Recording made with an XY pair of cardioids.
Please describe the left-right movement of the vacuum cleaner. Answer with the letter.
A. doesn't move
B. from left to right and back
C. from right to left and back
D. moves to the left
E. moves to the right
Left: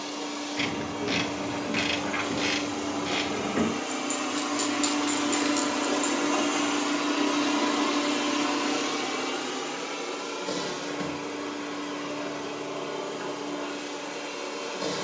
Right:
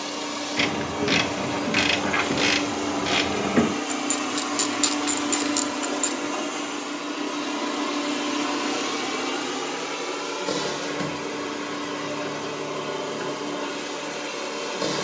C.